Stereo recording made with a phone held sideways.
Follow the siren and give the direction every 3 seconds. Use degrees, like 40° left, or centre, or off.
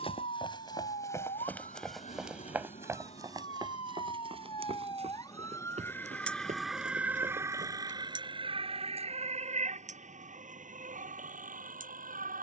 60° left, 40° left, 20° right, 60° right.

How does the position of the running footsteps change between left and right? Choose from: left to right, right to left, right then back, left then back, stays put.
left to right.